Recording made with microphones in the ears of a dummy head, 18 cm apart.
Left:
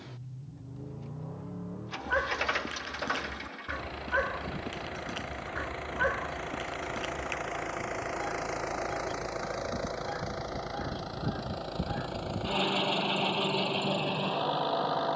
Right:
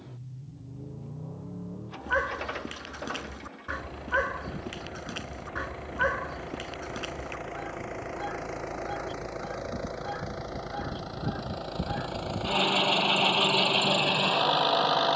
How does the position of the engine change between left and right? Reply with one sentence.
You can hear the engine move to the right.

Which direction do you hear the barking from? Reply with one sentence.
You can hear the barking in the centre.